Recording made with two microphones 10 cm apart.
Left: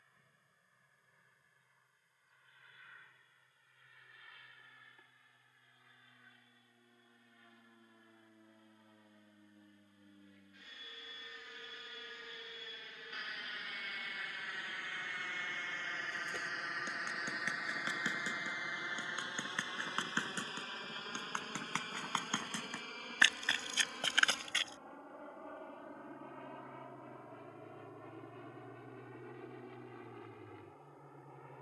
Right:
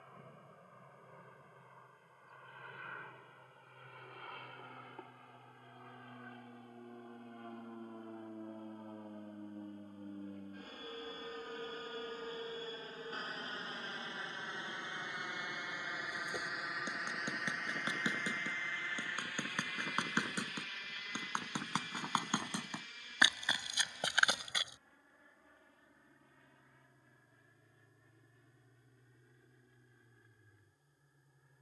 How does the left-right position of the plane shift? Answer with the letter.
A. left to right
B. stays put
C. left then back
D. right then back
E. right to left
E.